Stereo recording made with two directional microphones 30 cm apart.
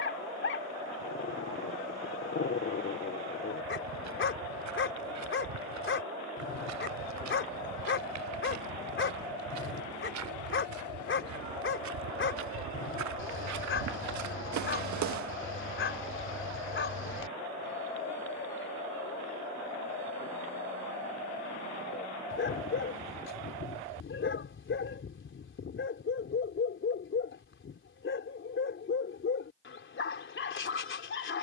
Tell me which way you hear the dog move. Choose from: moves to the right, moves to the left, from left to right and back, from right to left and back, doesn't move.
doesn't move.